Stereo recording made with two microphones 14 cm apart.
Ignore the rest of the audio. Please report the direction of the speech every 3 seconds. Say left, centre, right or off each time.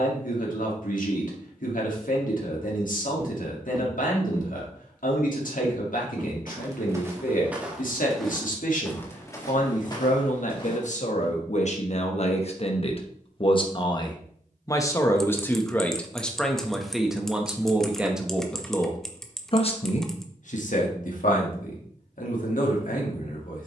left, left, left, left, left, centre, left, left.